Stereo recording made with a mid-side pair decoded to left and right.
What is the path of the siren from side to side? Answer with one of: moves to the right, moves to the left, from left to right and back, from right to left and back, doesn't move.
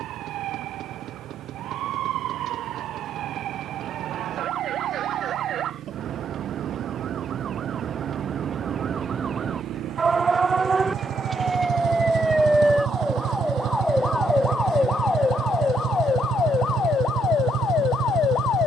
moves to the left.